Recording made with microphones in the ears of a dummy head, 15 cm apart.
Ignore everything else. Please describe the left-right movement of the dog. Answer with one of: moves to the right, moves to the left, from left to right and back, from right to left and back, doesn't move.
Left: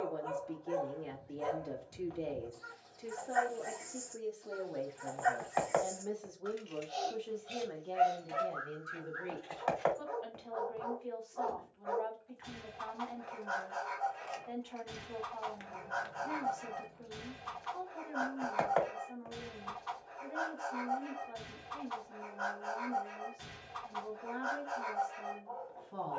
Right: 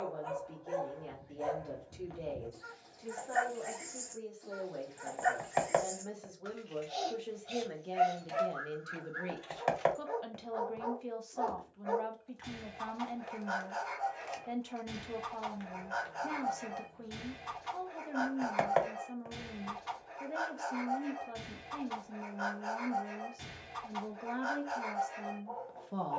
doesn't move.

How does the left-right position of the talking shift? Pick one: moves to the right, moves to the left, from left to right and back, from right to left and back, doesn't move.
moves to the right.